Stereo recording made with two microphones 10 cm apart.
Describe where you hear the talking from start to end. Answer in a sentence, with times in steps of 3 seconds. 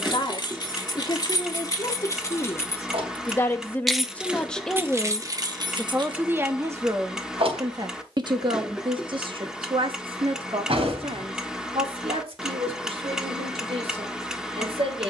You can hear the talking on the left from 0 s, in the centre from 3 s and on the right from 6 s.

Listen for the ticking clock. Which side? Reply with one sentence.
In this clip you hear the ticking clock in the centre.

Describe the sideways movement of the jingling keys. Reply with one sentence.
You can hear the jingling keys move to the right.